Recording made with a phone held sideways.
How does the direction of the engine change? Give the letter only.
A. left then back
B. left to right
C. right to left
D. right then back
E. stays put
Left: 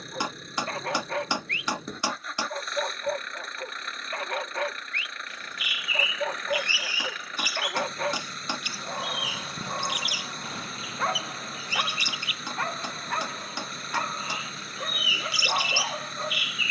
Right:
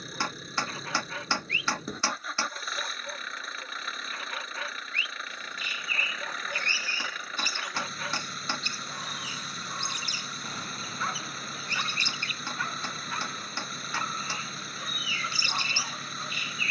E.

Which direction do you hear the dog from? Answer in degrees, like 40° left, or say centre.
60° left.